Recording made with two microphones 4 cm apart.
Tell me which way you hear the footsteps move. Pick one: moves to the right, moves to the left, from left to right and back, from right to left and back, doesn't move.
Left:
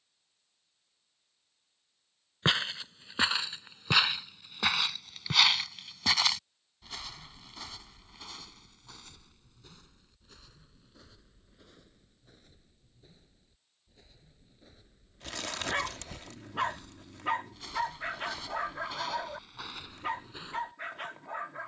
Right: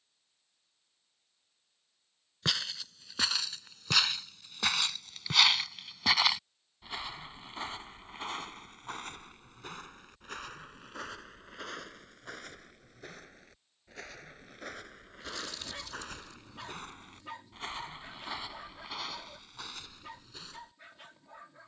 from left to right and back.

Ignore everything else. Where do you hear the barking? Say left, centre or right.
left.